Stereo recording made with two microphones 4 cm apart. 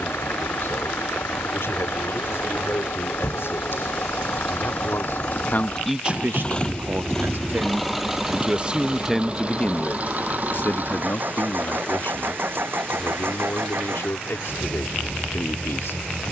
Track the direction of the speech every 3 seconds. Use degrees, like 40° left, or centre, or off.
80° left, 60° left, 50° right, 40° left, 70° left, 70° left.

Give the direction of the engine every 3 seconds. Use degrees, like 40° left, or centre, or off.
70° left, 50° left, 10° left, 40° right, 60° right, 70° right.